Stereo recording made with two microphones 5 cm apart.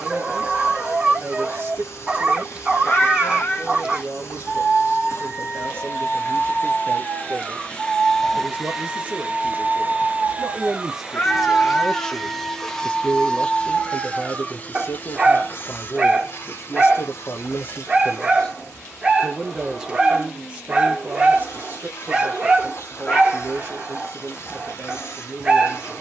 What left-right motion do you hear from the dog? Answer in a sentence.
In this clip you hear the dog stay put.